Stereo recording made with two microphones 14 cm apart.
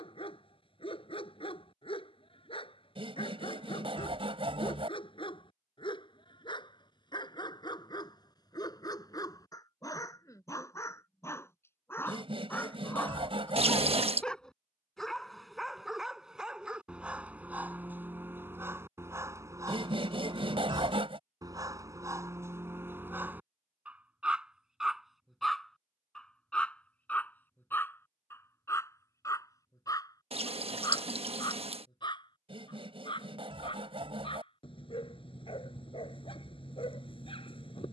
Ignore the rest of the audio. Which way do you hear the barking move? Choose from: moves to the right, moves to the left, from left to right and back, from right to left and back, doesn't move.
from left to right and back.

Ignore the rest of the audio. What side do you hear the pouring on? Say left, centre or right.
right.